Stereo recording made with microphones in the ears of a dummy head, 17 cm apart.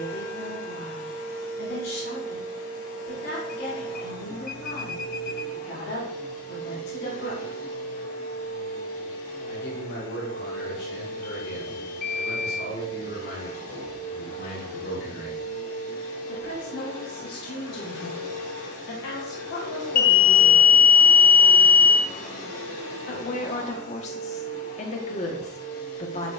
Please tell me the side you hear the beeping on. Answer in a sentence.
In this clip you hear the beeping on the left.